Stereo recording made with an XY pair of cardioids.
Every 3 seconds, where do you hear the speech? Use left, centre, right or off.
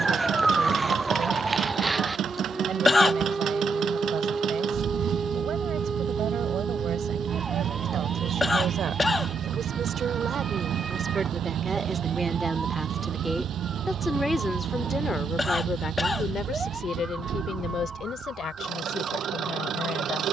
right, right, right, right, centre, left, left.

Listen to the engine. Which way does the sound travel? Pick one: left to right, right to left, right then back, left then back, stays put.
stays put.